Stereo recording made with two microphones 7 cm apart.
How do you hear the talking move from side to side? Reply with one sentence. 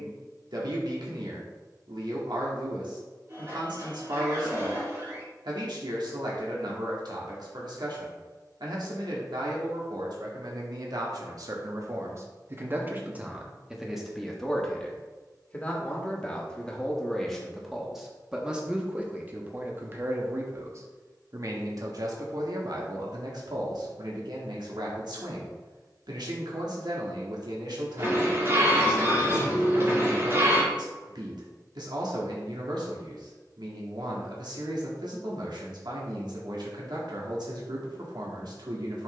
In this clip you hear the talking go left and come back.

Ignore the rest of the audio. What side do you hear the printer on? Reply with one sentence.
In this clip you hear the printer on the right.